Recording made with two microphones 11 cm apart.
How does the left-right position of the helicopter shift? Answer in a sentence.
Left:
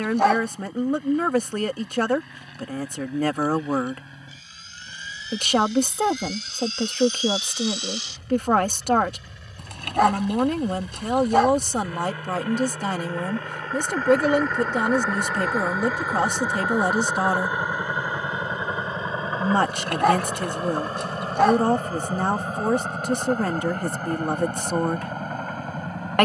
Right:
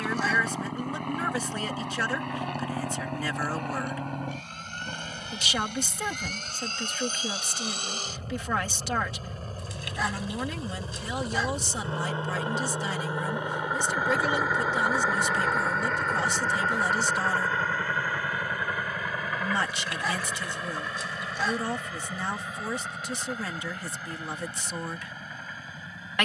In this clip you hear the helicopter move to the left.